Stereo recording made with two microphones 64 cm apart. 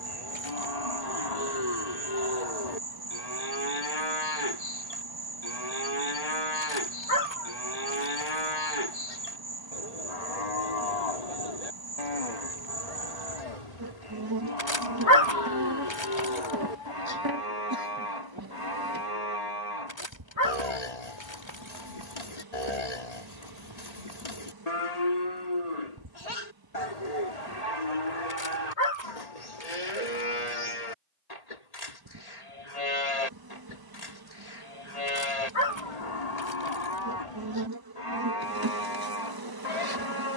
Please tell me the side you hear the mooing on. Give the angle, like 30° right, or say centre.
80° left.